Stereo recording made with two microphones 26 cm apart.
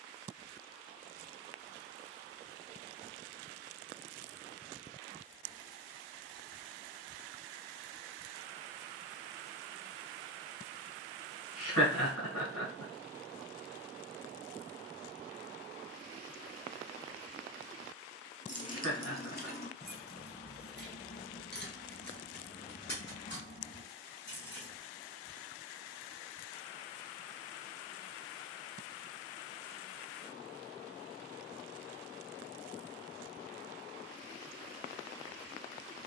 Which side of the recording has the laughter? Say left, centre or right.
left.